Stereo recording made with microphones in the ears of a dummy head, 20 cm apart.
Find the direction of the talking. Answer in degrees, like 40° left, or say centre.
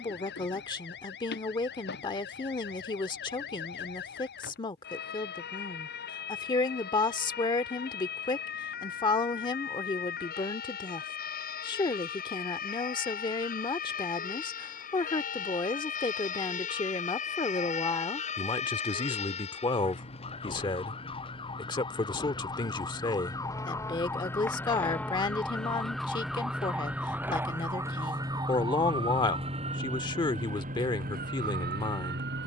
20° left.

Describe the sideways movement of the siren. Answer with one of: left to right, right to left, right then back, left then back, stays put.
left to right.